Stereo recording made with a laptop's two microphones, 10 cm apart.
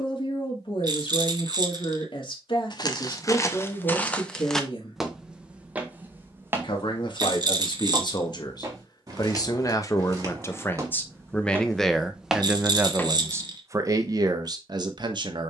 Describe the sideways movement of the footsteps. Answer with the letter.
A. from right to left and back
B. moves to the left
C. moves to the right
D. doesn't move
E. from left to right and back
E.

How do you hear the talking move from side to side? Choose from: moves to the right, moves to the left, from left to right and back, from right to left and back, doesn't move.
moves to the right.